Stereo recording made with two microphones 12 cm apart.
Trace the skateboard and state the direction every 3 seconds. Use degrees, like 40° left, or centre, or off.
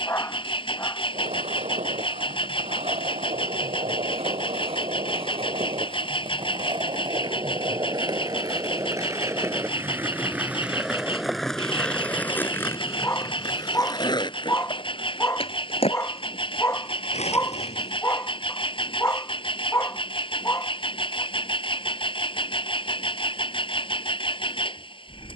60° right, 50° right, 40° right, 10° right, 30° left, 50° left, off, off, off.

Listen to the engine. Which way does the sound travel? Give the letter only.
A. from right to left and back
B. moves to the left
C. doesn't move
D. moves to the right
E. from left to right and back
C.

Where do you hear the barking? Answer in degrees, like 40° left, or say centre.
20° left.